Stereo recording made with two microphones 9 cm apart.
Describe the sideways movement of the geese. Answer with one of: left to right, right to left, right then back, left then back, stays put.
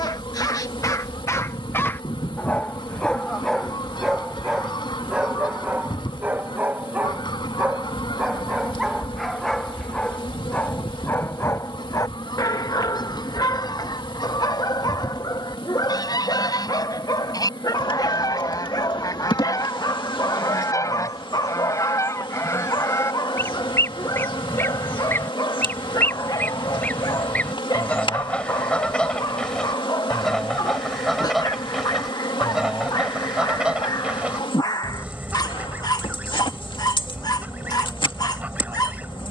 left to right.